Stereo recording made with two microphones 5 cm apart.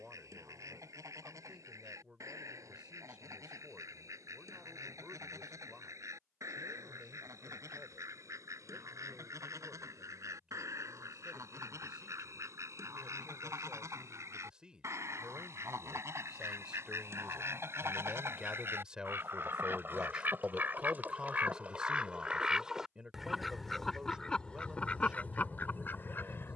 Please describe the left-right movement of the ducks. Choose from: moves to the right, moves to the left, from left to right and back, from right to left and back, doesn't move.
moves to the left.